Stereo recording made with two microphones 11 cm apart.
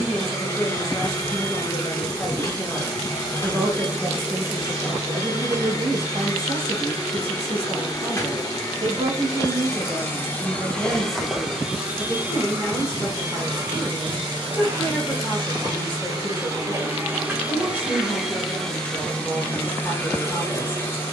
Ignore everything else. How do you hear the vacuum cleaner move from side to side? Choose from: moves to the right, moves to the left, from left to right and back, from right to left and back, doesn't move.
from left to right and back.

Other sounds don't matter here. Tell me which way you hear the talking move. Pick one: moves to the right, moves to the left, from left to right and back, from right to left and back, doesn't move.
from left to right and back.